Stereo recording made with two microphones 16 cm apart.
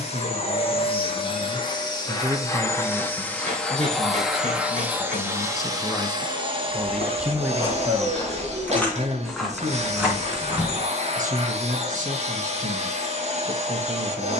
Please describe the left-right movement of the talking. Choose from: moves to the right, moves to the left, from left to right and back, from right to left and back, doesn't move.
from right to left and back.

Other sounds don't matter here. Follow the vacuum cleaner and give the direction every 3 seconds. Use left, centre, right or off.
left, centre, right, right, right.